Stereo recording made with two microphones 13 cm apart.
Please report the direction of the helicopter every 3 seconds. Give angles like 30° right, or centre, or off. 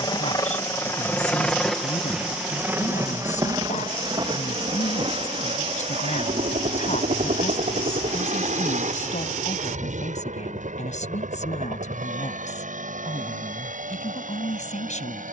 10° left, 40° right, 60° right, 70° right, 70° right.